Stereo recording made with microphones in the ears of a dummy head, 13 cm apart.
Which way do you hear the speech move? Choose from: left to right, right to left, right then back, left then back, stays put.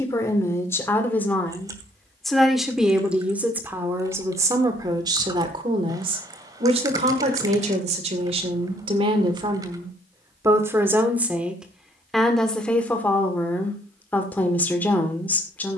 right then back.